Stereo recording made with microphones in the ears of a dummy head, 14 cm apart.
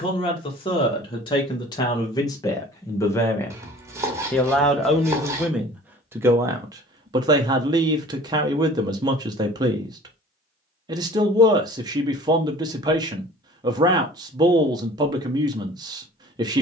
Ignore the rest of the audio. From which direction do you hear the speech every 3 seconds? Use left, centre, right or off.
left, centre, right, right, right, right.